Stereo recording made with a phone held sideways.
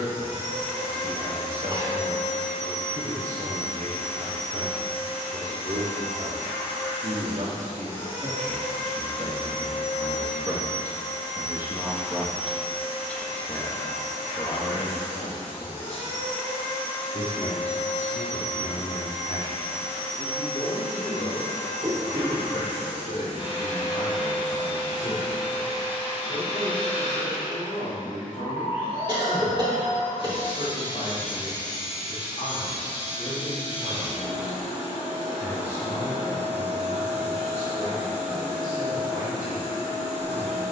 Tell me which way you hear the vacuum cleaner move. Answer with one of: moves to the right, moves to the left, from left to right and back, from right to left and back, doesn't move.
doesn't move.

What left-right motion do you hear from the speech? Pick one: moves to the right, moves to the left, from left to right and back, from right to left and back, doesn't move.
moves to the left.